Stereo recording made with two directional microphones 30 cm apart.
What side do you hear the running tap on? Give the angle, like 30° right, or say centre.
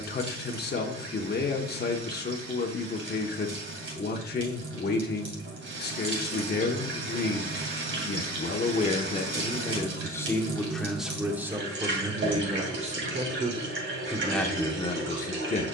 40° right.